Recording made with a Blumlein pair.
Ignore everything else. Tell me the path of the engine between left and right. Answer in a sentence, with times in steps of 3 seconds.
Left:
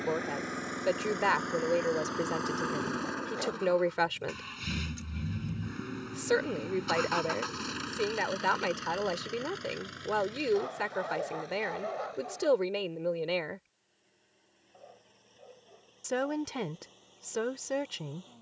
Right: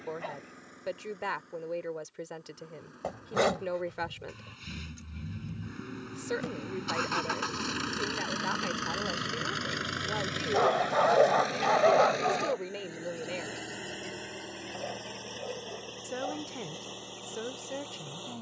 You can hear the engine on the left from 0 s, in the centre from 6 s and on the right from 9 s.